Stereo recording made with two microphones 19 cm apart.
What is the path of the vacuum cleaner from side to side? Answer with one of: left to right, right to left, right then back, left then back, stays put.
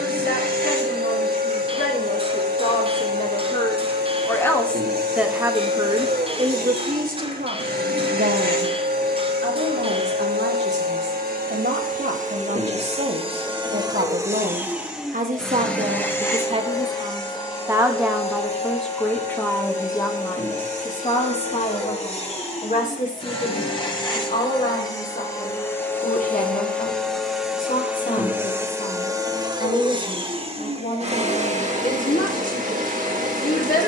left then back.